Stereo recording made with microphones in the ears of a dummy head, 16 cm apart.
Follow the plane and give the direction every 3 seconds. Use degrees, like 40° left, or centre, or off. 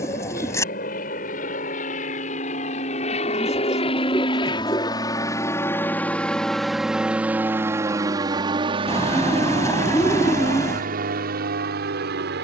50° left, 30° left, 10° right, 40° right.